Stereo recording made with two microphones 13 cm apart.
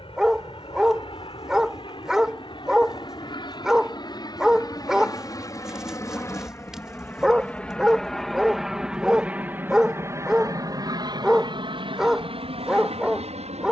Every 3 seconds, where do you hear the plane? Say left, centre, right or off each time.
left, left, centre, right, right.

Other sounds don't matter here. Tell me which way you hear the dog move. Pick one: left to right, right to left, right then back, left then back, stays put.
stays put.